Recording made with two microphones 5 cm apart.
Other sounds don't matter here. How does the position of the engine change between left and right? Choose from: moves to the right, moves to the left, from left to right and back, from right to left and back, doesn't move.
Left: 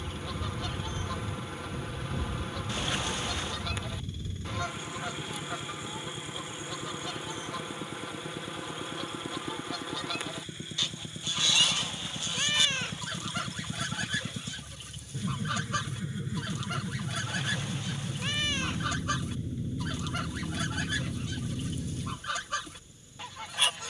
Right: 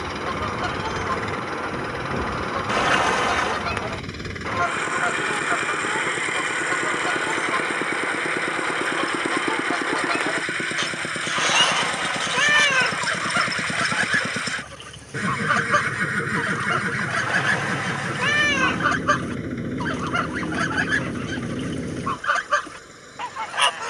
doesn't move.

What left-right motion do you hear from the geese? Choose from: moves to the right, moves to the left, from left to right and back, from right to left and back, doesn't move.
doesn't move.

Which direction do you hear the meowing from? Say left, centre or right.
right.